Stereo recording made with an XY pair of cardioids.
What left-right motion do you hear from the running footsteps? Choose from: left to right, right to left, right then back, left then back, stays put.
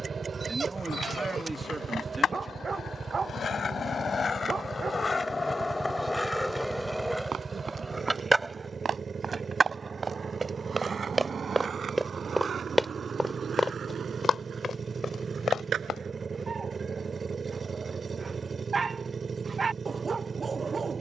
right to left.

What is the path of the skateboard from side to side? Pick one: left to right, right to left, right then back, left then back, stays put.
left to right.